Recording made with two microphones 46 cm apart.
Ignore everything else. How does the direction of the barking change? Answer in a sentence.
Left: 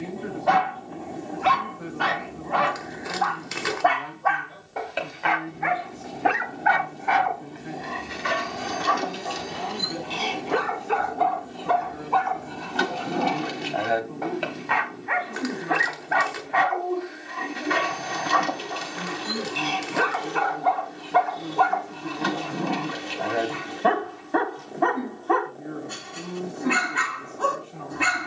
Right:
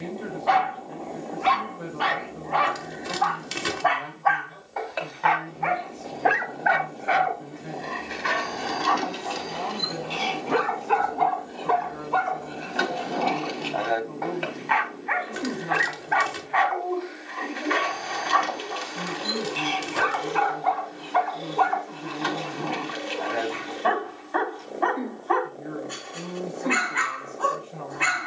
In this clip you hear the barking go right and come back.